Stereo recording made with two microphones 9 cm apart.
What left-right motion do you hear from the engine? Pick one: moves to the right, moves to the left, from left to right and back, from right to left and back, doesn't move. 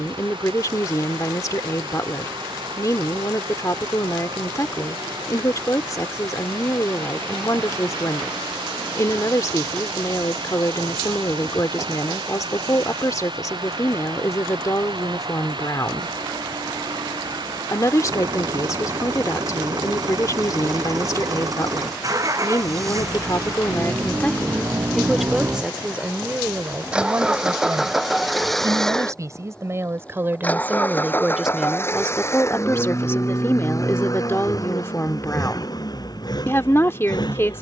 moves to the left.